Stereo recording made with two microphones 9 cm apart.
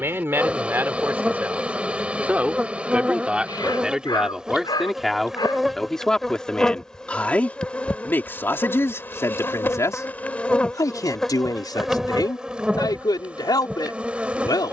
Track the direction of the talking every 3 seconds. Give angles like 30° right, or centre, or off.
20° right, centre, 20° left, 40° left, 50° left.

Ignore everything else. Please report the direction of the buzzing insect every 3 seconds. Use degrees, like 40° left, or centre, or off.
10° right, 10° right, 10° left, 10° left, 10° right.